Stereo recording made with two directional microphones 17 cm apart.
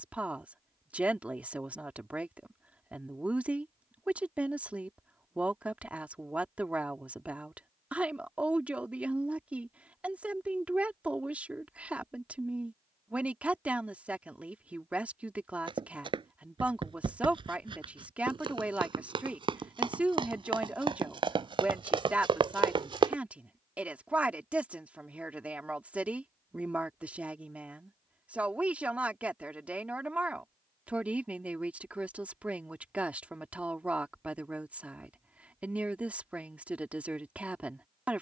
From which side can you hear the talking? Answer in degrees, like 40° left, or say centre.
10° right.